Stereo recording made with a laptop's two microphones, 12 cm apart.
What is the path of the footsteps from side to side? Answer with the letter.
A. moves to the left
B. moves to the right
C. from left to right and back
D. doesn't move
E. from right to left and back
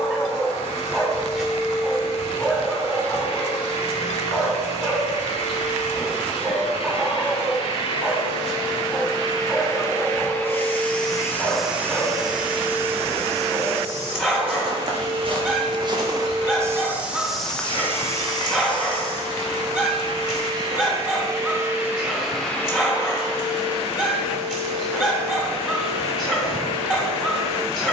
C.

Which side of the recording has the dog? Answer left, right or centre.
centre.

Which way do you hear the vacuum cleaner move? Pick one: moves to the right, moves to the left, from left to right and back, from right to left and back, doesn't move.
from left to right and back.